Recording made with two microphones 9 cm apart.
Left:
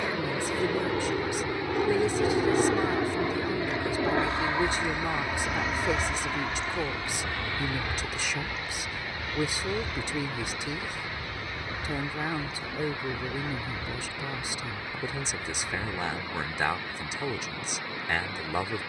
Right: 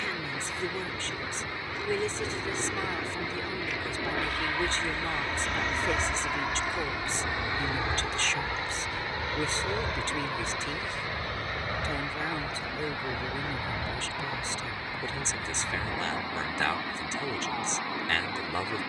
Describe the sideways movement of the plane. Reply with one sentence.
In this clip you hear the plane travel towards the right.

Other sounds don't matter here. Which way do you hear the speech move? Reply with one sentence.
You can hear the speech stay in one place.